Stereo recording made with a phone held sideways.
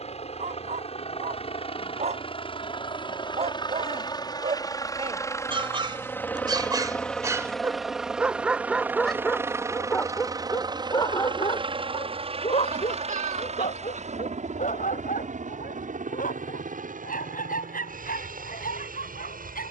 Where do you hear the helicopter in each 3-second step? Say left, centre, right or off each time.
left, left, centre, right, right, right, right.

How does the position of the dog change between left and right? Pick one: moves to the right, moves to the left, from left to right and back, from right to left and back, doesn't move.
moves to the left.